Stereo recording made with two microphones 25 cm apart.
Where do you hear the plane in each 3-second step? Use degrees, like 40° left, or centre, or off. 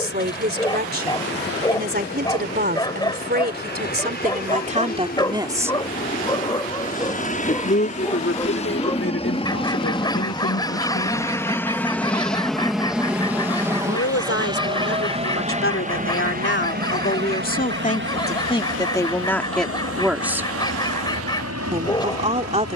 50° left, 40° left, 30° left, 20° left, 10° right, 30° right, 50° right, 60° right.